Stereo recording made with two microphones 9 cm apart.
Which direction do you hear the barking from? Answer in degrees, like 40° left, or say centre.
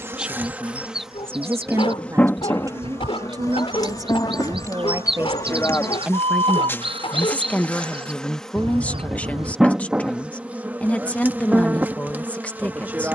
80° left.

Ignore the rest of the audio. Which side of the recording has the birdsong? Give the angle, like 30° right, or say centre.
70° right.